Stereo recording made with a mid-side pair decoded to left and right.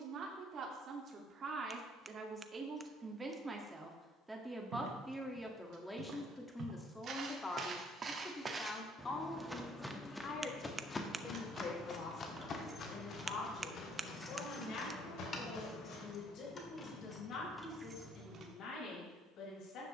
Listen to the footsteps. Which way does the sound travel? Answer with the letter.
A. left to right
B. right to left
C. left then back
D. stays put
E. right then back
B.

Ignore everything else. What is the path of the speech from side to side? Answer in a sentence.
You can hear the speech move from right to left.